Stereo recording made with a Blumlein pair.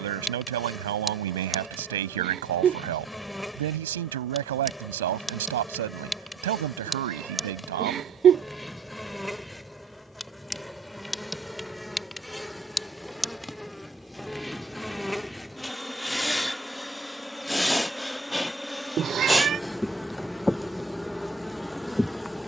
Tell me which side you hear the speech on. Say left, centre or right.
right.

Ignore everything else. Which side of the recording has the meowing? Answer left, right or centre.
right.